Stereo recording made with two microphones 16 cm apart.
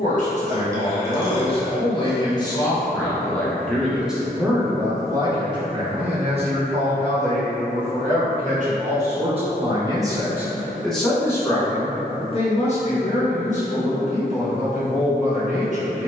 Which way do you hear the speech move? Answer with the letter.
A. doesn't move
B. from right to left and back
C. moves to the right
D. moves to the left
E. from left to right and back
E.